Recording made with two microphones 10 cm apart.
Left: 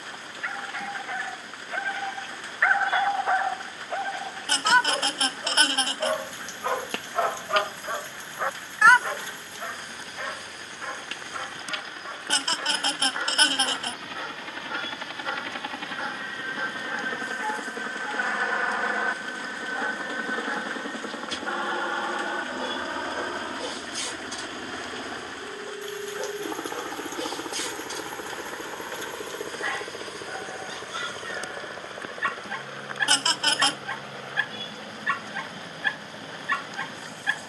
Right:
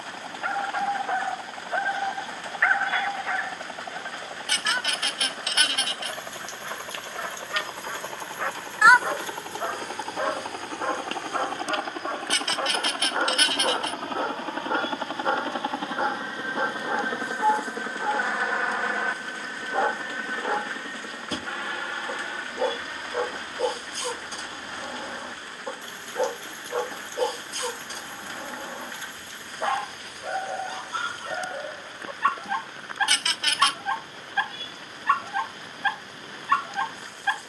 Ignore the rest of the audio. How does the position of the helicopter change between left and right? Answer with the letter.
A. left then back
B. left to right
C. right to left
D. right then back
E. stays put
C.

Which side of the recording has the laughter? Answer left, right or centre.
left.